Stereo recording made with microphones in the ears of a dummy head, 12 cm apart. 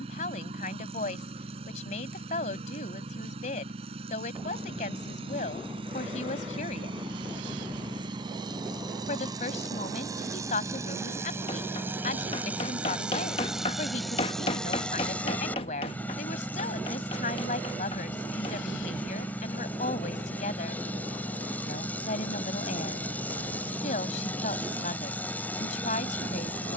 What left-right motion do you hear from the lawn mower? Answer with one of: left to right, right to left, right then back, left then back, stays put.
right to left.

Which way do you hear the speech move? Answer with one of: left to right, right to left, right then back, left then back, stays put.
stays put.